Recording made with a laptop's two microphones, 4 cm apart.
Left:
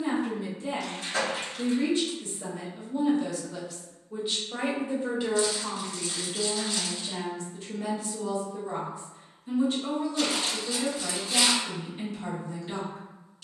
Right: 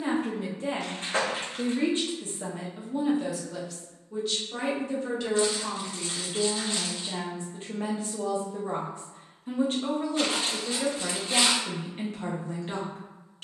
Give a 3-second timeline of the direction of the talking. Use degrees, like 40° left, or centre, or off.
40° right, centre, 30° right, 50° right, 50° right.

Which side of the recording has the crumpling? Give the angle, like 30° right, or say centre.
40° right.